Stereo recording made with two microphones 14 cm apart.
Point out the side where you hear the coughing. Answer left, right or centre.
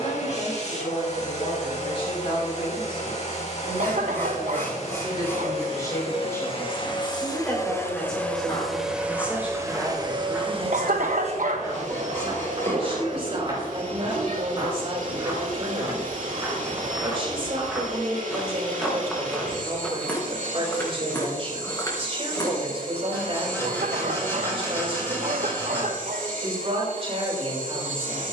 right.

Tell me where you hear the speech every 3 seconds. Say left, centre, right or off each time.
left, left, centre, right, right, right, right, right, right, right.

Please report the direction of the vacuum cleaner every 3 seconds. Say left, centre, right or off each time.
left, left, left, right, right, right, right, right, right, right.